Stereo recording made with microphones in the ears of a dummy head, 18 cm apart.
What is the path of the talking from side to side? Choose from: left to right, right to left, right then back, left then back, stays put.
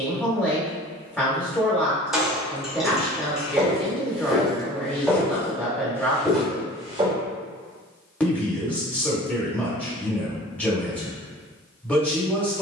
stays put.